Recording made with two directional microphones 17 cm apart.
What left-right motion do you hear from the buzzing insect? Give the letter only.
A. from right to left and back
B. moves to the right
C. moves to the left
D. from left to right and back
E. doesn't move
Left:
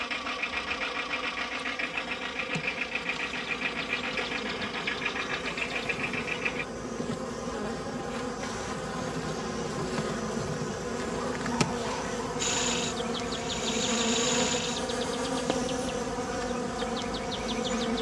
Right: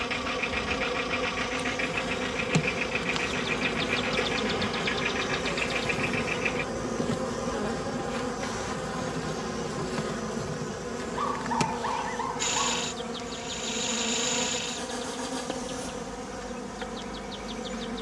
C.